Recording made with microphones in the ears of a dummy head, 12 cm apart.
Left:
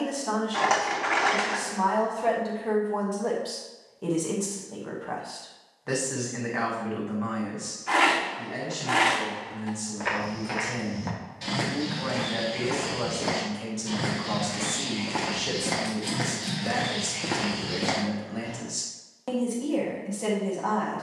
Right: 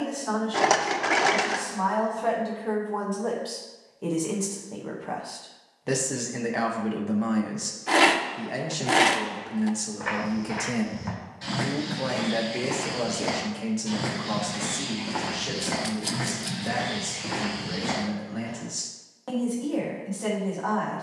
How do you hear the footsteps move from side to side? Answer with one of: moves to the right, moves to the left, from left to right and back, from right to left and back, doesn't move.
from left to right and back.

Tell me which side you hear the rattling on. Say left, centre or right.
right.